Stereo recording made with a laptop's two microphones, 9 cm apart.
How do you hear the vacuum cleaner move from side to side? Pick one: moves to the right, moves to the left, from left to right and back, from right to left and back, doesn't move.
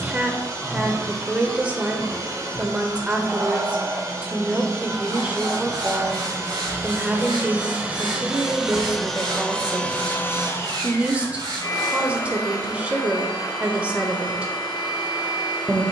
moves to the left.